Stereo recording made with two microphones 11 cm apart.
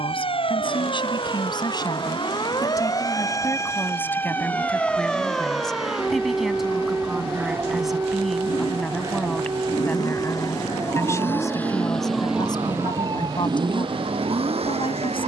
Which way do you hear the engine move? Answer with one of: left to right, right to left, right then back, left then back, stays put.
left to right.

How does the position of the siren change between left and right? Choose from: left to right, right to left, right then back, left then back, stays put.
left to right.